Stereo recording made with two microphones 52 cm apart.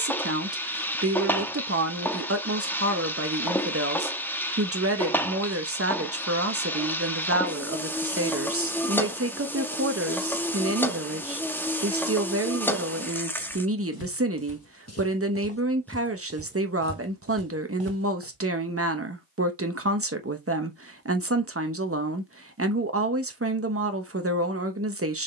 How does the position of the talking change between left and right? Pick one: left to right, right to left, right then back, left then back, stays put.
stays put.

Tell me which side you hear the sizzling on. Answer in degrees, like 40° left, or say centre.
centre.